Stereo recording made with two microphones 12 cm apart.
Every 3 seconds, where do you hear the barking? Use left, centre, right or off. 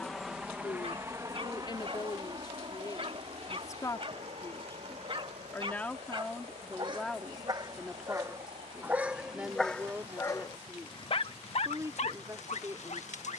right, right, right, left, left.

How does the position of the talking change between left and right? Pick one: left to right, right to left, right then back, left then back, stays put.
left to right.